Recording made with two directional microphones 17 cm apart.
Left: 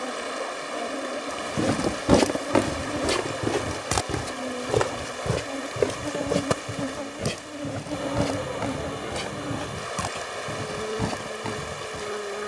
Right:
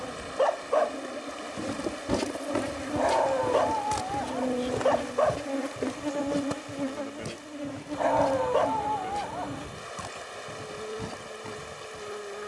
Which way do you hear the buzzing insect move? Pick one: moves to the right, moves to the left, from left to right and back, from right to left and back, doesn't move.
from left to right and back.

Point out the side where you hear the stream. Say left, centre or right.
left.